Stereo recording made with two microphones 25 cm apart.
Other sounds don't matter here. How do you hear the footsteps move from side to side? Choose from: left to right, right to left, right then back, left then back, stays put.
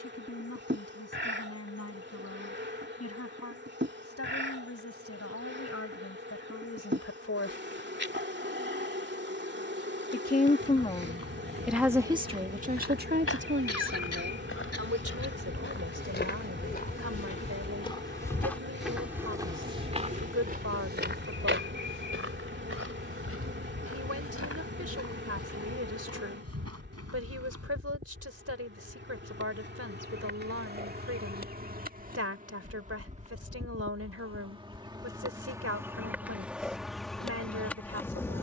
left to right.